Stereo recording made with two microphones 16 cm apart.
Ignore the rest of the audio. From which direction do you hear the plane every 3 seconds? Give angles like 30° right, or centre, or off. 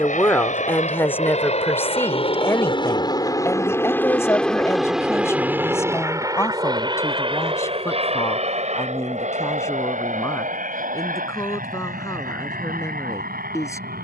50° left, centre, 30° right, 50° right, 60° right.